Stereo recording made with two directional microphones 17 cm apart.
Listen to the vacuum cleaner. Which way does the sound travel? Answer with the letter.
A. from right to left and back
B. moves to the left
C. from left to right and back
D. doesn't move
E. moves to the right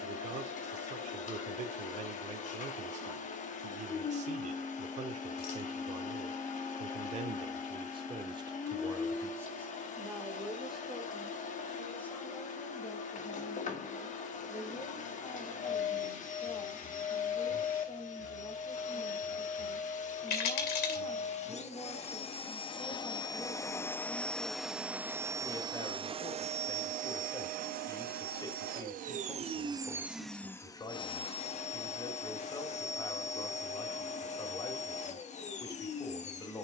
C.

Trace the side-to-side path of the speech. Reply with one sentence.
In this clip you hear the speech travel towards the left.